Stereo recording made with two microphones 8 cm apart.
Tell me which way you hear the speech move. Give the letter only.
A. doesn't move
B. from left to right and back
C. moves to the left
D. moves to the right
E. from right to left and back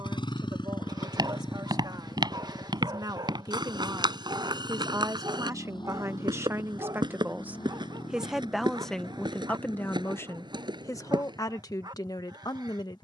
C.